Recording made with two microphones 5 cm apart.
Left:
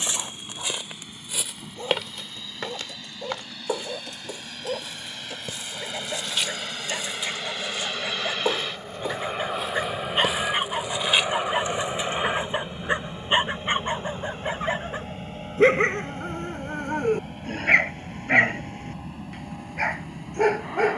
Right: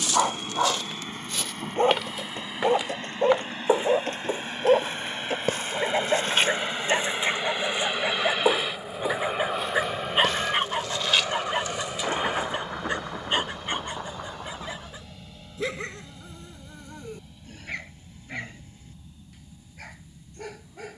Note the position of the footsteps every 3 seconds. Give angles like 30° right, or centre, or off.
10° left, 40° right, 30° right, 10° left, 30° left, off, off.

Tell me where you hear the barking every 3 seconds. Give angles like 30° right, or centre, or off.
50° right, 50° right, 30° right, 10° right, 30° left, 50° left, 60° left.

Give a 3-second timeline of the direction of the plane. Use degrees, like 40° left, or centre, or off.
50° right, 40° right, 20° right, centre, 30° left, 40° left, 60° left.